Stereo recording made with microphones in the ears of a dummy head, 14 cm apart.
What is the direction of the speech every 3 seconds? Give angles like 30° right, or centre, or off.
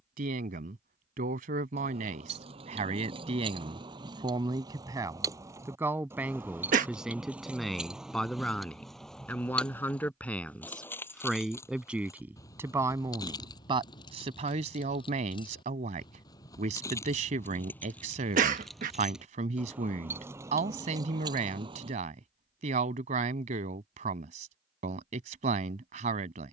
50° right, 30° right, centre, 10° left, 30° right, 40° right, 40° right, 40° right, 40° right.